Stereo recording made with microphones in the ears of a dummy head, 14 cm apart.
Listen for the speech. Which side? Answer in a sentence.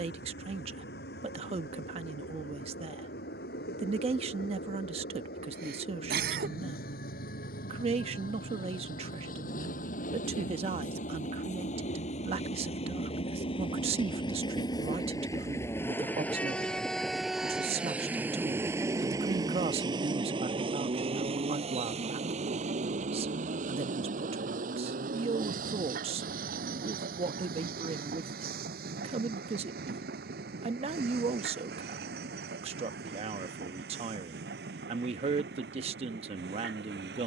You can hear the speech on the right.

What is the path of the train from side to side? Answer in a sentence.
You can hear the train travel towards the right.